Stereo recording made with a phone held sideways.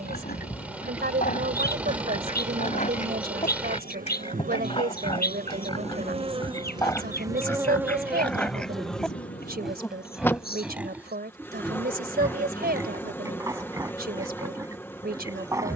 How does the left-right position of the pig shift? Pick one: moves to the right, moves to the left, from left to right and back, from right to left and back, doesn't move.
moves to the right.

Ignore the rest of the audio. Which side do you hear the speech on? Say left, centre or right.
right.